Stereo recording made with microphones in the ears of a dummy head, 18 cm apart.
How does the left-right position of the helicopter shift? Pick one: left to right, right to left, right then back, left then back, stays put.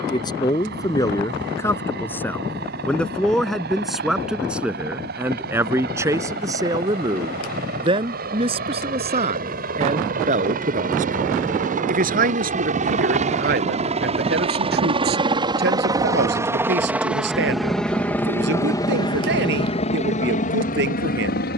right to left.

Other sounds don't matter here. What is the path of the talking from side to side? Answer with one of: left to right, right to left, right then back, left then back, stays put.
left to right.